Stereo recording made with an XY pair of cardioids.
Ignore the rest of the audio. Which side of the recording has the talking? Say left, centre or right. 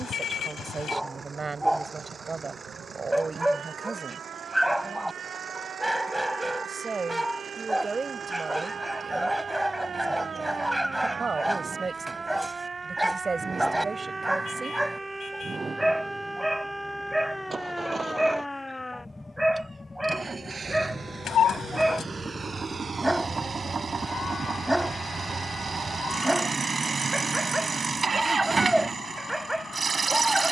right.